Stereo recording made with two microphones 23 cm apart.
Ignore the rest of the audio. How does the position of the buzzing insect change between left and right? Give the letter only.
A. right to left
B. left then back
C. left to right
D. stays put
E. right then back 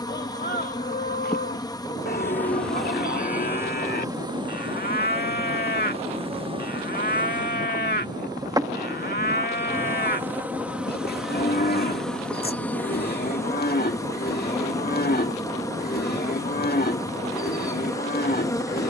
E.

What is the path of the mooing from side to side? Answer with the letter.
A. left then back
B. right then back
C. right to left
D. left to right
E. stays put
E.